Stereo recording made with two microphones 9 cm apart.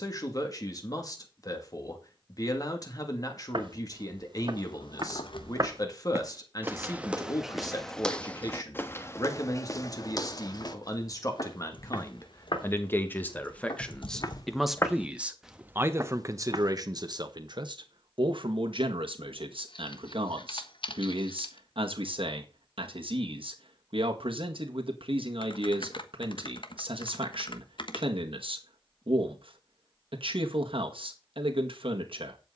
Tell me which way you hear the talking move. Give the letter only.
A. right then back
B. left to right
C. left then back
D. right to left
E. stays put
B.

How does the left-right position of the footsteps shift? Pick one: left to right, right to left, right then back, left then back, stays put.
left then back.